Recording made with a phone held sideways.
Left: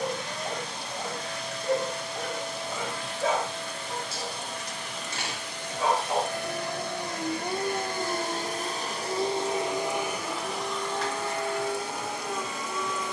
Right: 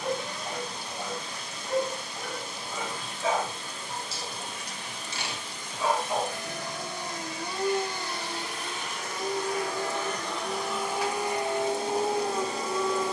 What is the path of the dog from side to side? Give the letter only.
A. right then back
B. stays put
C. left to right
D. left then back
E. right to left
C.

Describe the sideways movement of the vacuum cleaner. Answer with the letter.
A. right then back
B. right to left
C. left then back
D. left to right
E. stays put
D.